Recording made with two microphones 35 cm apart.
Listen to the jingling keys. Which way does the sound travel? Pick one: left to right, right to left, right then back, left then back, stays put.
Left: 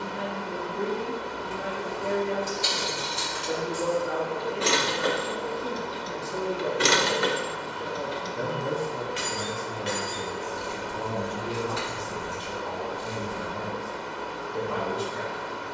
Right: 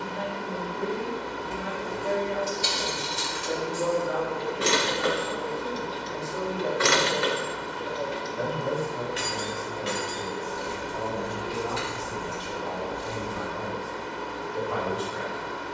left then back.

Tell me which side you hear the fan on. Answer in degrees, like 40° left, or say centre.
30° right.